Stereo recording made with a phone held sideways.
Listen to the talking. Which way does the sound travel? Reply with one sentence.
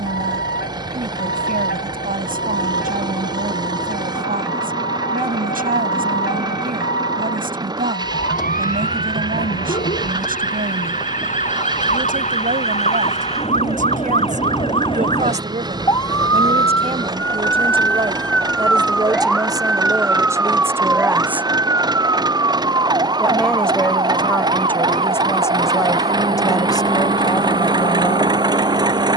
You can hear the talking move to the left.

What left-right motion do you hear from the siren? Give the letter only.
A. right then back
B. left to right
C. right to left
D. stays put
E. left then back
B.